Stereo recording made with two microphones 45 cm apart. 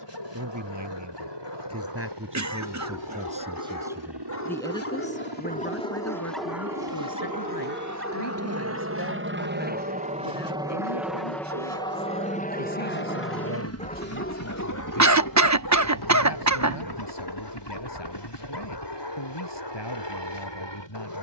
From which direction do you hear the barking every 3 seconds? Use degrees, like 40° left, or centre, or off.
60° left, 30° left, 20° right, 40° right, 10° left, 60° left, 60° left.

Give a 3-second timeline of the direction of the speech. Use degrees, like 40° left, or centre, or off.
30° right, centre, 50° left, 70° left, 70° left, 70° left, 70° left.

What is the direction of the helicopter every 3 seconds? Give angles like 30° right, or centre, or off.
70° right, 60° right, 40° right, 10° right, 30° left, 50° left, 60° left.